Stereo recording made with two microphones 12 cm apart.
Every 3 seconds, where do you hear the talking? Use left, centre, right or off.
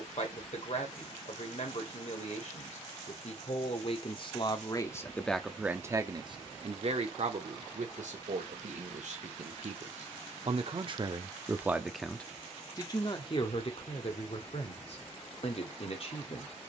left, left, right, right, left, left.